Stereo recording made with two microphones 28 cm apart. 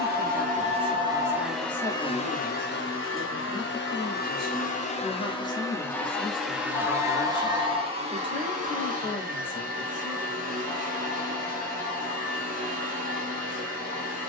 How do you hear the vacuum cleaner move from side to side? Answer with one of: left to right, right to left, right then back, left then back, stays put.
left then back.